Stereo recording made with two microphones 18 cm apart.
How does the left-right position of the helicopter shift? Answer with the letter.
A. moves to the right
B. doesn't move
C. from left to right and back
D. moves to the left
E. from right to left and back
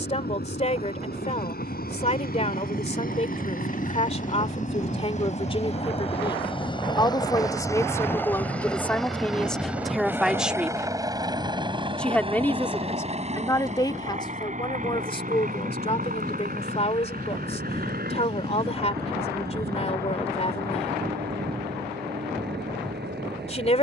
A.